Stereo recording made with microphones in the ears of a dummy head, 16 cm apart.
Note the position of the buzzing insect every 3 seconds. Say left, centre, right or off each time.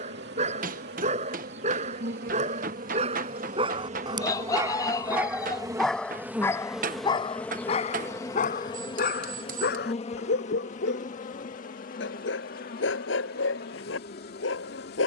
right, right, centre, left, left.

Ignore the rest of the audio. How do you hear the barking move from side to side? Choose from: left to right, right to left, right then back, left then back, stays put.
right to left.